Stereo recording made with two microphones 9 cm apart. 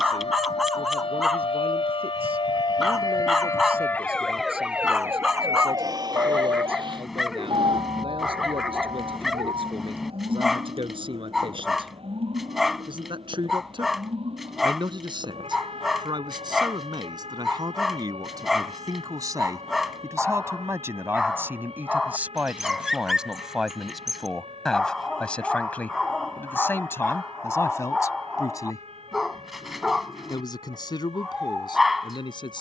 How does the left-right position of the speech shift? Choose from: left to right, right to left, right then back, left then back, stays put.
right to left.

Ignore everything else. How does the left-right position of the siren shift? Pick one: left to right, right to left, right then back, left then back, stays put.
left to right.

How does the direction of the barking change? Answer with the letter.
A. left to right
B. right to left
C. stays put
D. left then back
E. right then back
C.